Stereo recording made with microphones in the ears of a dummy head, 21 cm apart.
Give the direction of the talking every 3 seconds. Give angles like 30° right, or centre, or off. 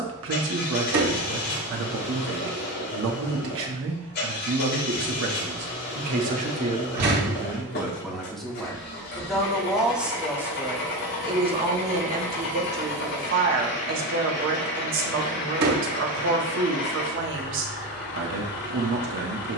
60° right, 60° right, 10° right, 10° right, 50° right, 60° right, 60° right.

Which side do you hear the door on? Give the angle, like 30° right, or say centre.
70° right.